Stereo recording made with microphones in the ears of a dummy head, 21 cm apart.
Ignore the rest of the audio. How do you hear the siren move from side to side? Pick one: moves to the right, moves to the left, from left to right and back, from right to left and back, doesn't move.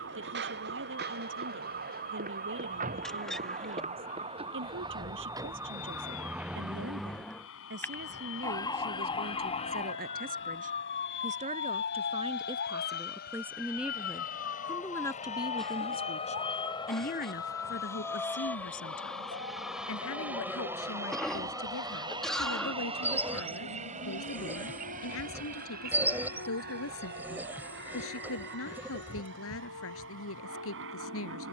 moves to the left.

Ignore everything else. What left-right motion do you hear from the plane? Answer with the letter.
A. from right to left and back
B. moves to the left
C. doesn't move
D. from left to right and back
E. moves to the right
E.